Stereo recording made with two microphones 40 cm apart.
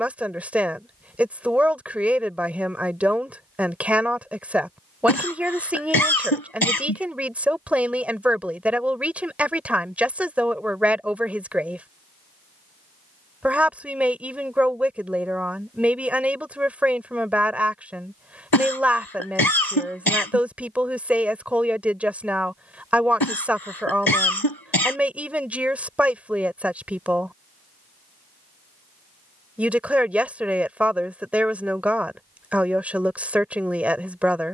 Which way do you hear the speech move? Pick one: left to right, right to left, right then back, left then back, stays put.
stays put.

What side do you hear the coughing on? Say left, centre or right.
left.